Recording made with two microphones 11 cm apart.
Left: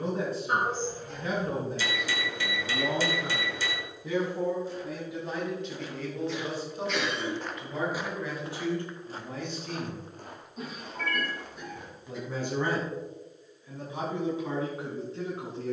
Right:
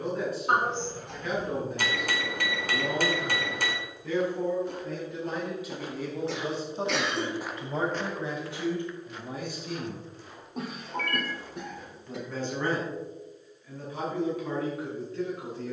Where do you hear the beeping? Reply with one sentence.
You can hear the beeping on the right.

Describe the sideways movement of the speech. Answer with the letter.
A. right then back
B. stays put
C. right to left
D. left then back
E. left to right
A.